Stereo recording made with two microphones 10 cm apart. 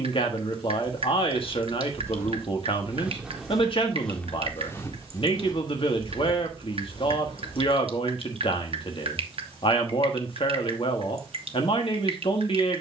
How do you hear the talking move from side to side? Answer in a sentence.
You can hear the talking stay in one place.